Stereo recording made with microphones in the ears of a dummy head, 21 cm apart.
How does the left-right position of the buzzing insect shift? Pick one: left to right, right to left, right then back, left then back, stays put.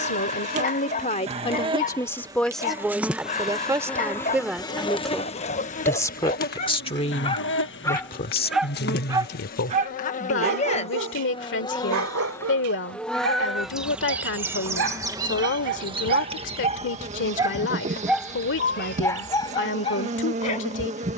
left then back.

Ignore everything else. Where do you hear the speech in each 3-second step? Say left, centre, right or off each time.
left, centre, left, left, left, left, left.